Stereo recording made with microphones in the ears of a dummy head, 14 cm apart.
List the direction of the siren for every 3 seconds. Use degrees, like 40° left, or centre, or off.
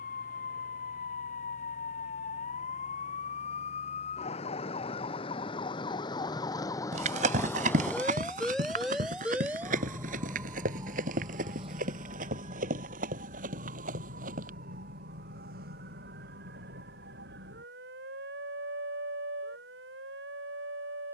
50° left, 40° left, 10° left, 20° right, 50° right, 60° right, 70° right.